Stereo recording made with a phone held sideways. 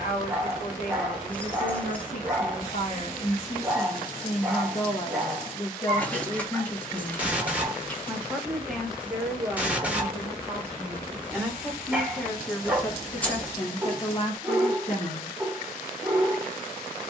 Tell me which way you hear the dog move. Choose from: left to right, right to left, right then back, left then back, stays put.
stays put.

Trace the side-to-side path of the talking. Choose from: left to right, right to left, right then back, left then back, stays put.
right then back.